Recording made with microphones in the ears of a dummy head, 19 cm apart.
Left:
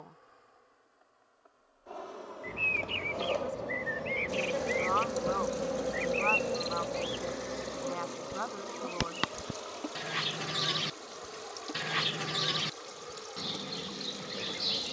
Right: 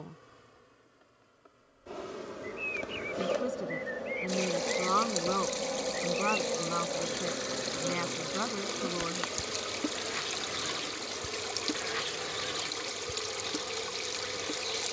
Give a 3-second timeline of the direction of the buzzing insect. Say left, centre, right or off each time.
right, centre, centre, right, right.